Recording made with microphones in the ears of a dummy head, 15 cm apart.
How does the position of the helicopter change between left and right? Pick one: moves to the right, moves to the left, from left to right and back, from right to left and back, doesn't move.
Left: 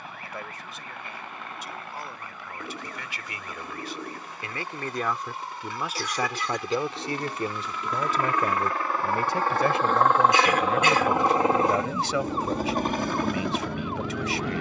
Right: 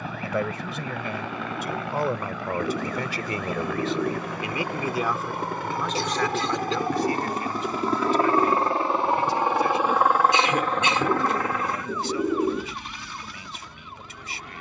moves to the left.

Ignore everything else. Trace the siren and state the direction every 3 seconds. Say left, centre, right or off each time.
right, right, right, centre, left.